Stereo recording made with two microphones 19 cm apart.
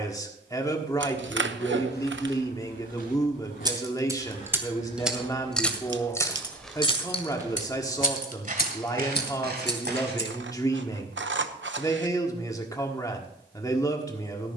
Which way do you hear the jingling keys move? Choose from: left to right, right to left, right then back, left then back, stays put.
right to left.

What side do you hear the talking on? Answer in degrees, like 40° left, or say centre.
20° left.